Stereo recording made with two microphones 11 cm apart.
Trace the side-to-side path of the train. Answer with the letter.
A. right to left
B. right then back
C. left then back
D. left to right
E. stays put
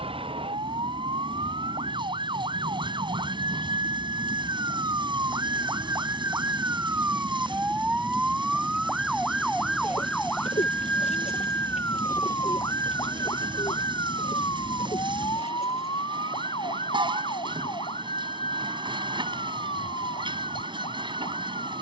E.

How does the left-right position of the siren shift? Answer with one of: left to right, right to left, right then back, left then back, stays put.
right to left.